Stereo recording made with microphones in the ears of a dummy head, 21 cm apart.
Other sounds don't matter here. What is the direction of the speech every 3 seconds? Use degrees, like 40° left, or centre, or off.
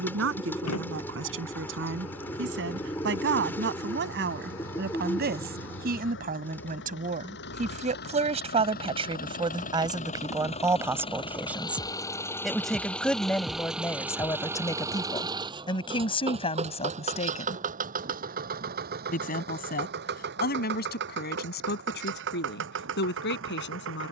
60° right, 50° right, 30° right, 10° right, 10° left, 20° left, 40° left, 50° left.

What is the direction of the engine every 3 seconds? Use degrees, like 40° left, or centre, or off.
70° left, 60° left, 50° left, 30° left, centre, 30° right, 40° right, 50° right.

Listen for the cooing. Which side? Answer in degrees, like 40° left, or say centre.
10° left.